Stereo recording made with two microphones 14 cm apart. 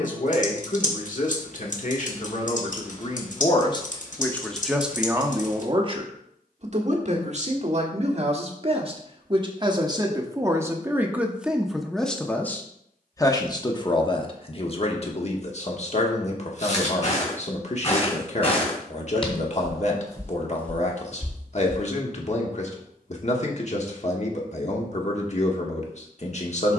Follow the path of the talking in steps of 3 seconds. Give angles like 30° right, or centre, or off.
60° left, centre, 50° right, 20° right, 30° left, 50° left, 50° left, 50° left, 50° left.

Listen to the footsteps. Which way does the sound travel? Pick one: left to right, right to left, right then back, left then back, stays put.
left to right.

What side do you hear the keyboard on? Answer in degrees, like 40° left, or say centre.
60° left.